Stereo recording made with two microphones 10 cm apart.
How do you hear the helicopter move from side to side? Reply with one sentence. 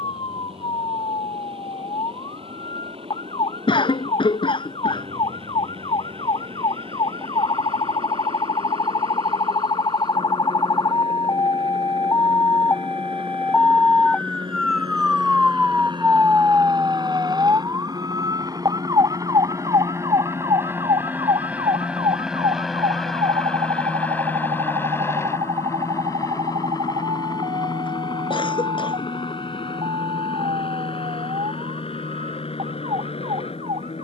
You can hear the helicopter move to the left.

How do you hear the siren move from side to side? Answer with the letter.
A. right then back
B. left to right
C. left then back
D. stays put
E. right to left
B.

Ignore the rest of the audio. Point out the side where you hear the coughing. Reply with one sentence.
You can hear the coughing on the left.